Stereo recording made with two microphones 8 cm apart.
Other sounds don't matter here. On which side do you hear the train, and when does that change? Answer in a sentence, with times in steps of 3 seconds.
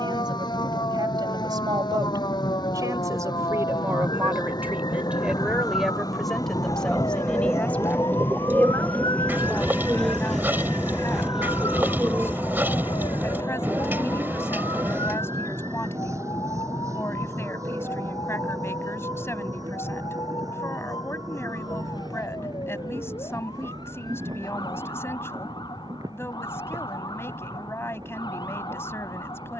In this clip you hear the train on the left from 0 s, in the centre from 9 s and on the right from 12 s.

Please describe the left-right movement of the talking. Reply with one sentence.
In this clip you hear the talking move to the left.